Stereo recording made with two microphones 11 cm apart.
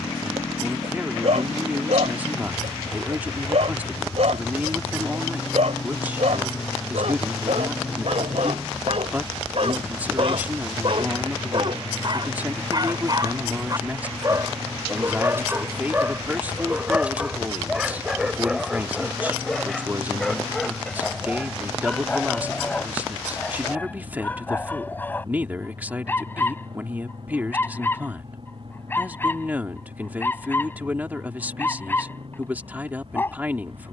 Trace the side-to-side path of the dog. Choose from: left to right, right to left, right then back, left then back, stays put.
right to left.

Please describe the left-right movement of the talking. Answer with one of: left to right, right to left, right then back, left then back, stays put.
stays put.